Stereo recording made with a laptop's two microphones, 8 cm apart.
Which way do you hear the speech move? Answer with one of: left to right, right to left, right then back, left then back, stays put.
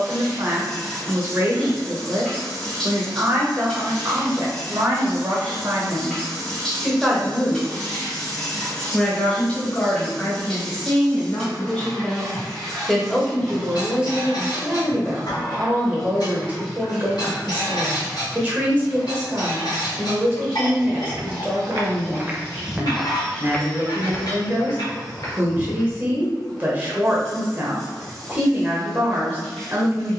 left then back.